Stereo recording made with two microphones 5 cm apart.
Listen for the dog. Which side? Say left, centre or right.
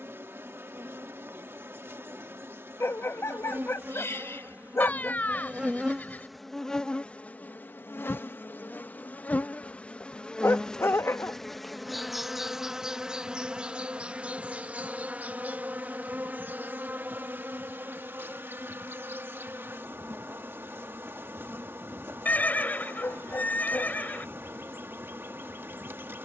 left.